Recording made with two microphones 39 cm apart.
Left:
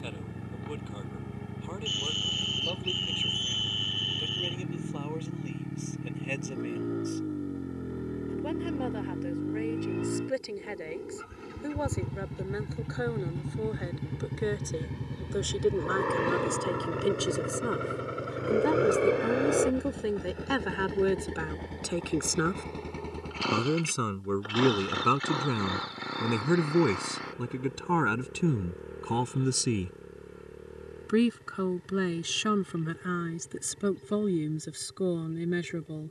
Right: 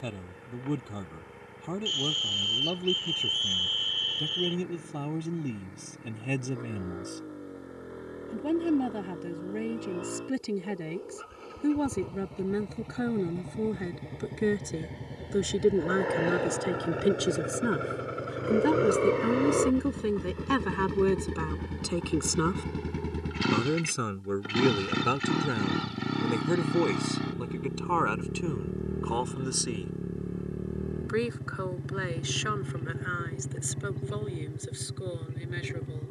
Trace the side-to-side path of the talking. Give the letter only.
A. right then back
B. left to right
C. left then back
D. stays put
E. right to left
E.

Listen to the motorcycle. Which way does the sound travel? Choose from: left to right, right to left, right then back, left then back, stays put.
left to right.